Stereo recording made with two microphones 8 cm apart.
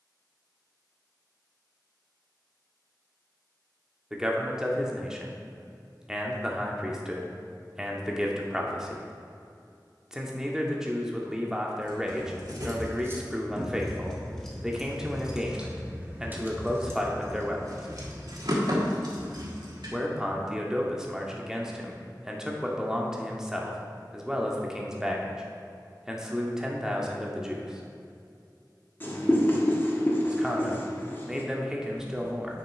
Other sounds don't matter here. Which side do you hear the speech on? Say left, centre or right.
centre.